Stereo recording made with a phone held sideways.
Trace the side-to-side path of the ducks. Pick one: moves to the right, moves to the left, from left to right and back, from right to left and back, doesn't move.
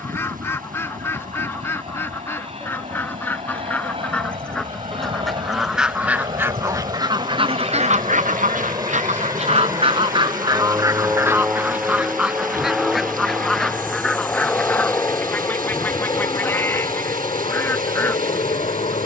from left to right and back.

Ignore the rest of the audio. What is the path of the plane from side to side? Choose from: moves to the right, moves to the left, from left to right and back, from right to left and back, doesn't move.
moves to the left.